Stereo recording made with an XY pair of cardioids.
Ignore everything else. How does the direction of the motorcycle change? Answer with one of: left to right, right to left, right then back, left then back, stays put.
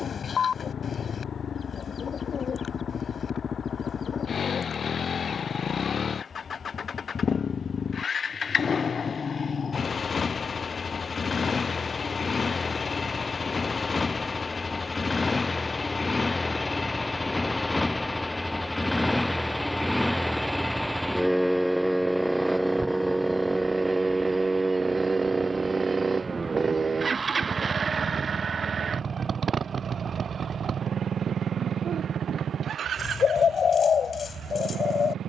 left to right.